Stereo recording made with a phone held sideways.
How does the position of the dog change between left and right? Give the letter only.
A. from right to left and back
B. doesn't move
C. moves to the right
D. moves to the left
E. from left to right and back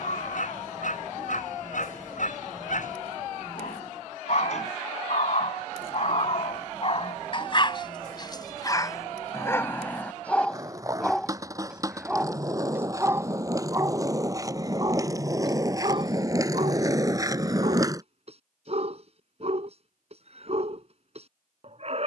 C.